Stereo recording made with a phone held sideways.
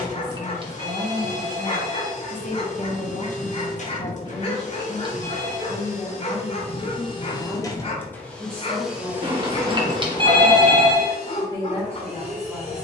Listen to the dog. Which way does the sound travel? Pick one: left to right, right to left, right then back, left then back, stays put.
stays put.